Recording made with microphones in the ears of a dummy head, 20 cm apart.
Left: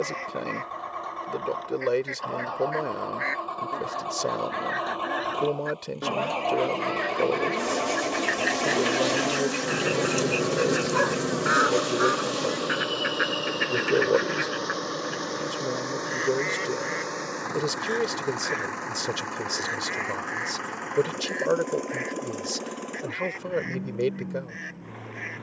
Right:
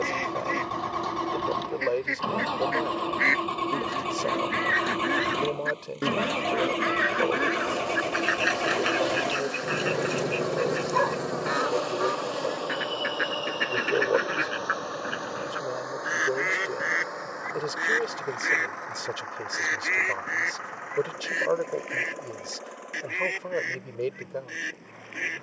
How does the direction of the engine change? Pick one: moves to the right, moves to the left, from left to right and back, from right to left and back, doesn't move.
moves to the left.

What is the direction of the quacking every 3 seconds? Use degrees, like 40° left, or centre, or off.
50° right, 40° right, 20° right, centre, centre, 20° right, 40° right, 50° right, 50° right.